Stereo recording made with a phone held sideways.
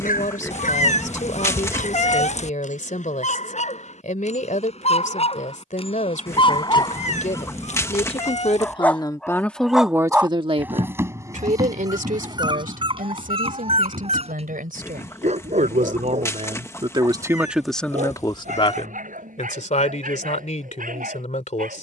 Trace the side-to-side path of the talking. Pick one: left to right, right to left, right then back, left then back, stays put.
right then back.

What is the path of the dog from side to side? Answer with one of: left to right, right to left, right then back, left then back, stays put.
left to right.